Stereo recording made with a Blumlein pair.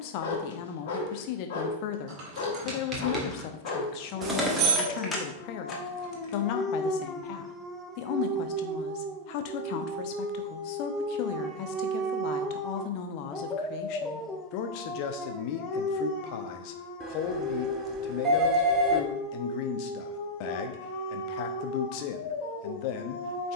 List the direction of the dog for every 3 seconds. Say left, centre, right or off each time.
left, left, centre, right, centre, left, left, left.